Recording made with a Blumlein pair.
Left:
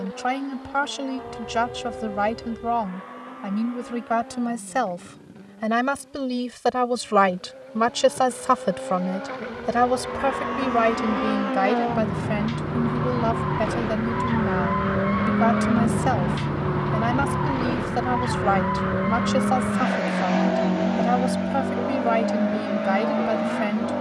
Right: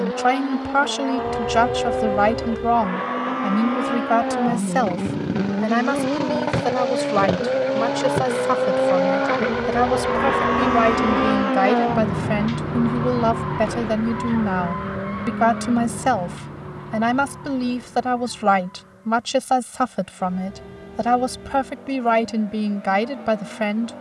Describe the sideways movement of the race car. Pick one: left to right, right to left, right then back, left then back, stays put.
right to left.